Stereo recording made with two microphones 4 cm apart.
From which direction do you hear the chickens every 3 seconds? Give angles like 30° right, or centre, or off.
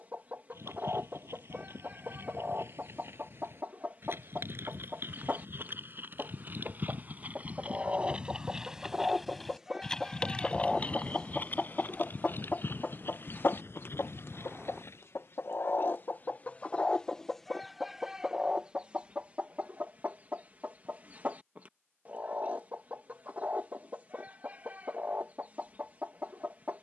40° right, 40° right, 30° right, centre, 50° left, 30° left, 30° right, 30° right, 30° right.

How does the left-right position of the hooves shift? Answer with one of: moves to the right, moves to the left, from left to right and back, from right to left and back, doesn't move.
moves to the left.